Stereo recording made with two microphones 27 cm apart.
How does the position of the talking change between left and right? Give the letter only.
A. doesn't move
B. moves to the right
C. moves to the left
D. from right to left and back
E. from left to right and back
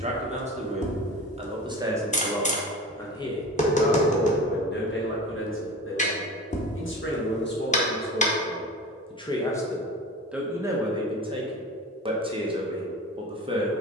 D.